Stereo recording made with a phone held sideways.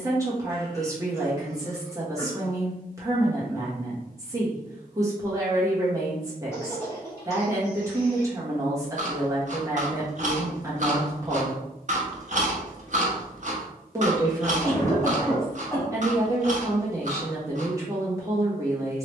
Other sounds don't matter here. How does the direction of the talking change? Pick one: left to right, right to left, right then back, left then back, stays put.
stays put.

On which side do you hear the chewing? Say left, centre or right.
right.